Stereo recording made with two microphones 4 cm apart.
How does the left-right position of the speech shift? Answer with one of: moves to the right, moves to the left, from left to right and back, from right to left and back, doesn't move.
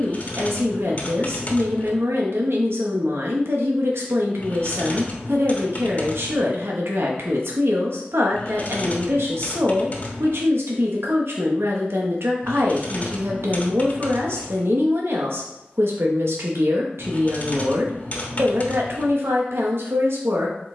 doesn't move.